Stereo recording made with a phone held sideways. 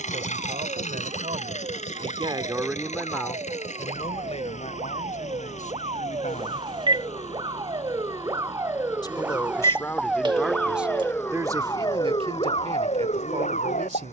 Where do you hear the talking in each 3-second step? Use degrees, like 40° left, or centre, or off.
40° right, 40° left, 50° left, centre, 50° right.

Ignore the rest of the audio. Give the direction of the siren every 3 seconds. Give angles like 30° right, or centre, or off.
50° right, 40° right, 30° right, centre, 40° left.